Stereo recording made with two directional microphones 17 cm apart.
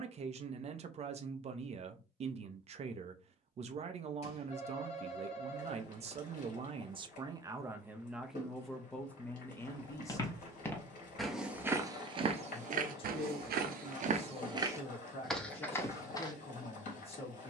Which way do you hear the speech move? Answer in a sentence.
In this clip you hear the speech move from right to left.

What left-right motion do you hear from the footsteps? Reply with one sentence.
In this clip you hear the footsteps move from left to right and back again.